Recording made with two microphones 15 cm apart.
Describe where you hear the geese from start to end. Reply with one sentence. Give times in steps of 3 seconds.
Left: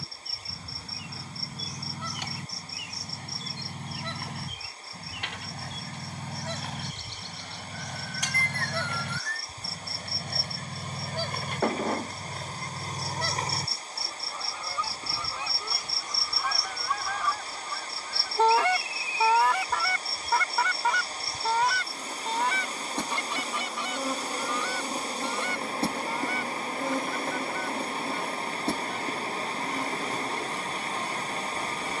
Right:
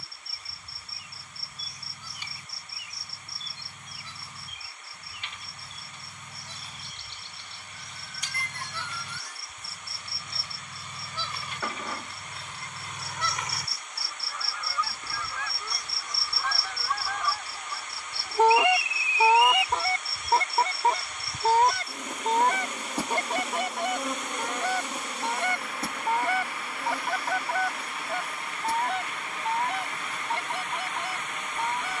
In this clip you hear the geese on the left from 0 s, in the centre from 15 s and on the right from 18 s.